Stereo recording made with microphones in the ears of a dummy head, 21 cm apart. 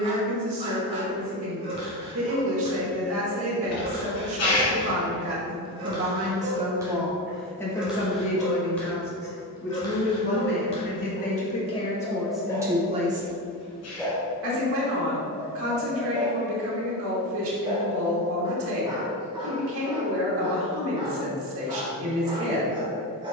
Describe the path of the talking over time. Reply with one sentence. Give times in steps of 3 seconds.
You can hear the talking on the right from 0 s, in the centre from 6 s, on the left from 9 s and on the right from 12 s.